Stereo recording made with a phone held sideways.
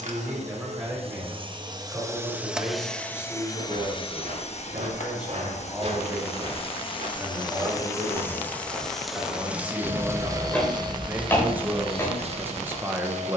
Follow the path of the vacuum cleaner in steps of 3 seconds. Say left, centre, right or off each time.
right, left, left, right, right.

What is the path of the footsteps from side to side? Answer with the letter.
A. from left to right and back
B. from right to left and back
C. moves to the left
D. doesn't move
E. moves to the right
C.